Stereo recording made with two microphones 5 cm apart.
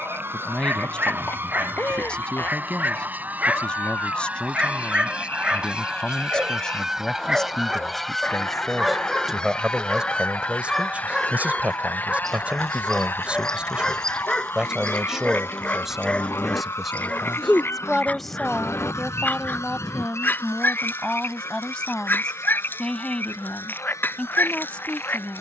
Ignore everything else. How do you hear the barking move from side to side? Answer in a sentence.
In this clip you hear the barking go from the right side to the left.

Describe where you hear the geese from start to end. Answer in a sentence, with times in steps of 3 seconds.
You can hear the geese on the right from 0 s, in the centre from 6 s and on the left from 9 s.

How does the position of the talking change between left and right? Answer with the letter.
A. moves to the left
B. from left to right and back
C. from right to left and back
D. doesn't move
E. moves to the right
B.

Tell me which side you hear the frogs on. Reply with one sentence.
In this clip you hear the frogs on the left.